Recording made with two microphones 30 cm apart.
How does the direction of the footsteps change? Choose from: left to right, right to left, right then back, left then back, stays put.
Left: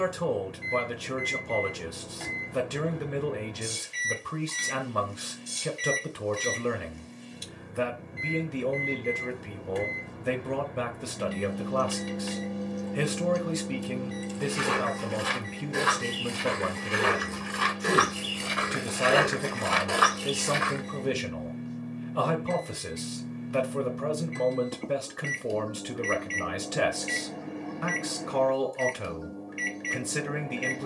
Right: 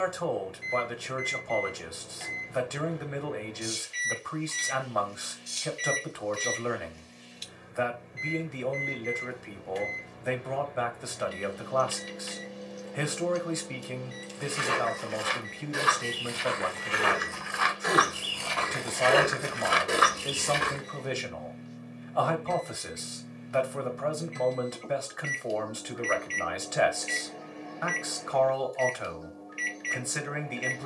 left to right.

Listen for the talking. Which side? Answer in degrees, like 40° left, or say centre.
40° left.